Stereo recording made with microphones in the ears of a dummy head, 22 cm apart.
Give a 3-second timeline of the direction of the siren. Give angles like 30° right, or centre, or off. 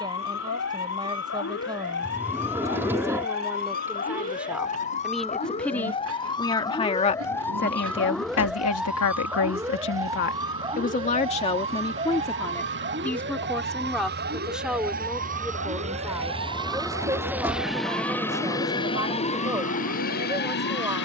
50° left, 30° left, 10° left, 20° right, 40° right, 50° right, 60° right.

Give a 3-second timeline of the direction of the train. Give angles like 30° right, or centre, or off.
70° right, 70° right, 70° right, 60° right, 50° right, 20° right, 30° left.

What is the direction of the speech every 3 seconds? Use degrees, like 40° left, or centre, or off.
20° right, centre, 40° left, 40° left, centre, 10° right, 10° right.